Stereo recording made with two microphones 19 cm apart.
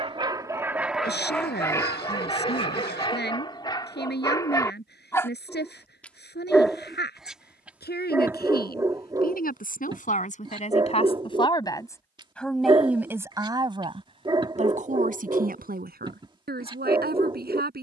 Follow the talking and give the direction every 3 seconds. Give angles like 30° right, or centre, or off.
60° left, 60° left, 60° left, 40° left, 20° right, 60° right.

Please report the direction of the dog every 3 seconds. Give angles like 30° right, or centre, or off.
10° left, 20° left, 10° right, 20° right, 30° right, 30° right.